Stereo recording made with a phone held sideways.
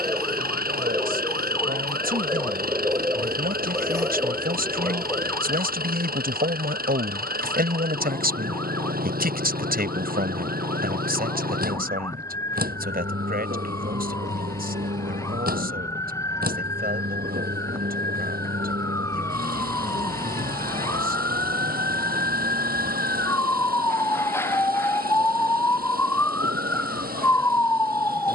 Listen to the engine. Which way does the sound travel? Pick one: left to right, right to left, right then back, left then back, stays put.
stays put.